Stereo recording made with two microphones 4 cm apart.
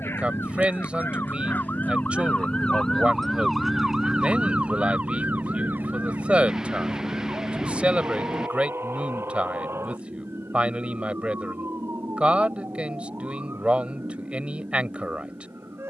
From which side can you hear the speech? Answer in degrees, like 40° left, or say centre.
30° right.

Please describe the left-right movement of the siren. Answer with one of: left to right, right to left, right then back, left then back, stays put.
left to right.